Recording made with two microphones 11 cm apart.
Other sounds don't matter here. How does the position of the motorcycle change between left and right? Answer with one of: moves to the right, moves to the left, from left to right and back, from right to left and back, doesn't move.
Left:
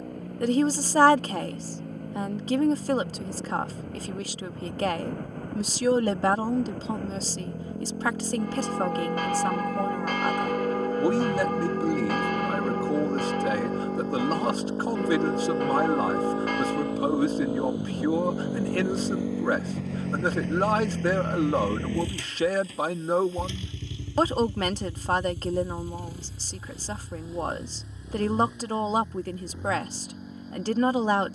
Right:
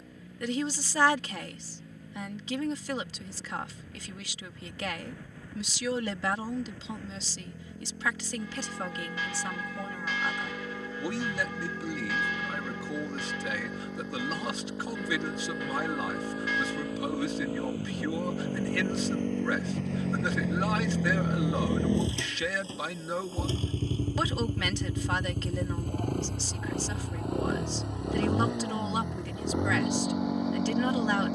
moves to the right.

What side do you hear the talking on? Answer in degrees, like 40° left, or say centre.
40° left.